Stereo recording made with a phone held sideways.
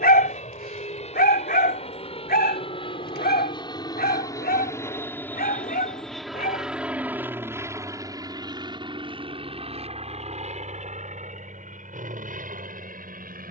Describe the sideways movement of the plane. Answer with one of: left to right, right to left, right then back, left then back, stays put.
left to right.